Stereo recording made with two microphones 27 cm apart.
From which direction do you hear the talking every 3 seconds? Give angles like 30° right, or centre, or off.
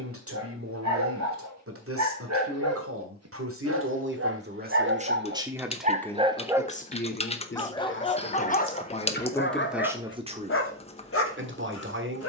50° right, 30° right, 30° left, 20° right.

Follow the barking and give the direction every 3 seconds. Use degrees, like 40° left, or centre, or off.
70° right, 50° right, 10° left, 50° left.